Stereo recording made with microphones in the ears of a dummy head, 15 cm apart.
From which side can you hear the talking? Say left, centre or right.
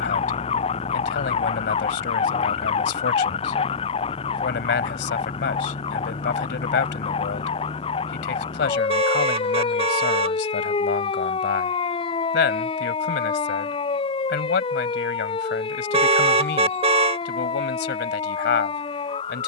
left.